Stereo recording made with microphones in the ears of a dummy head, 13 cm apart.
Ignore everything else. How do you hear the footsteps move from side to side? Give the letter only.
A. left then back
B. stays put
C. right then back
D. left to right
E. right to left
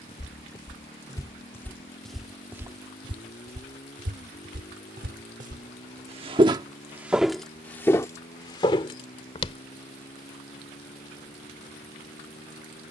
C.